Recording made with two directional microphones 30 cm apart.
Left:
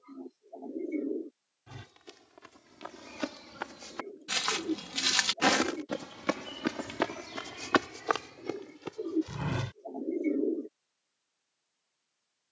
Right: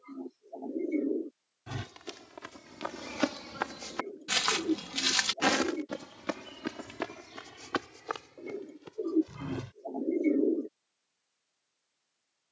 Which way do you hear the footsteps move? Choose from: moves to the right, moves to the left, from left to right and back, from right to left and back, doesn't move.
moves to the left.